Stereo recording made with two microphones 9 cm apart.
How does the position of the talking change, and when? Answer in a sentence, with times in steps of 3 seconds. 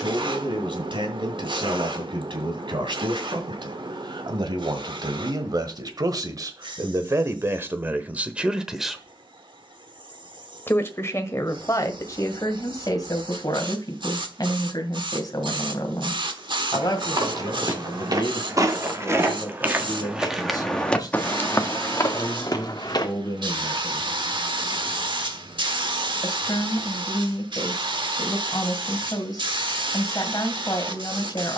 In this clip you hear the talking on the right from 0 s and on the left from 9 s.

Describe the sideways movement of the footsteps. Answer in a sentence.
In this clip you hear the footsteps move to the left.